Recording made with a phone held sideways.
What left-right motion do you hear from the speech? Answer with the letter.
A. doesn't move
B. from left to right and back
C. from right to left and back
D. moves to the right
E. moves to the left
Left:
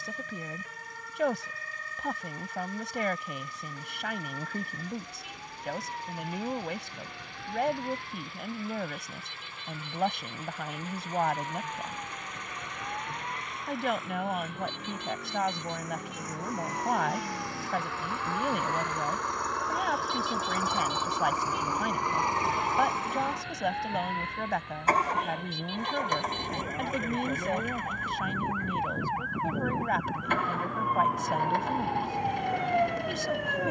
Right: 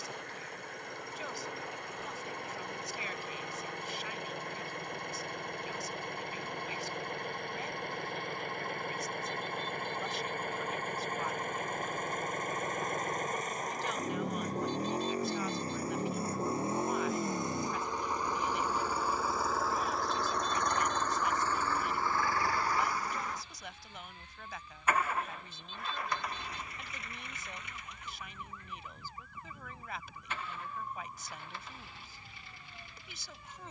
A.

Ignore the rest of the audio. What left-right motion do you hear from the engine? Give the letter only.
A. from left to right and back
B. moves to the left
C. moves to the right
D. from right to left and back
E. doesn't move
B.